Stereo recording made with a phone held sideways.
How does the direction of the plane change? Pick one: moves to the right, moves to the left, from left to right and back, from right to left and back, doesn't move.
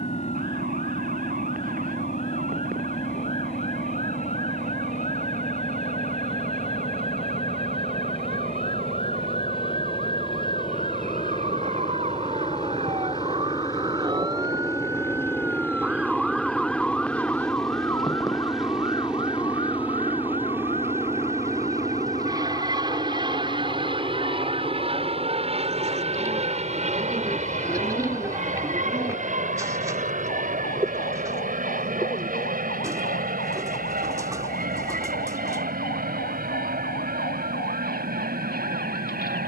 moves to the right.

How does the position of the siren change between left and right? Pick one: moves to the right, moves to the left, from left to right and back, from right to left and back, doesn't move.
moves to the left.